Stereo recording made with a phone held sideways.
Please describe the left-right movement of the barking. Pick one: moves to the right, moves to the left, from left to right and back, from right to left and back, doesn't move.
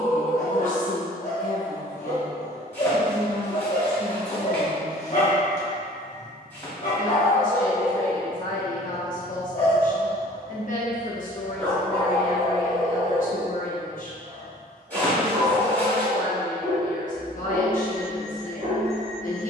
moves to the right.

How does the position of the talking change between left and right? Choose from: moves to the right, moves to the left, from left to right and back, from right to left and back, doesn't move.
doesn't move.